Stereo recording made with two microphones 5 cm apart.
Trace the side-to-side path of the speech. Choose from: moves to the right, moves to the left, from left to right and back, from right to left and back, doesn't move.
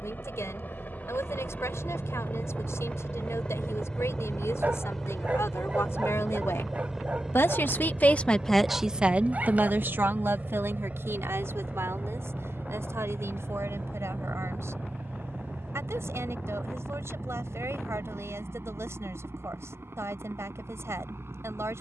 moves to the right.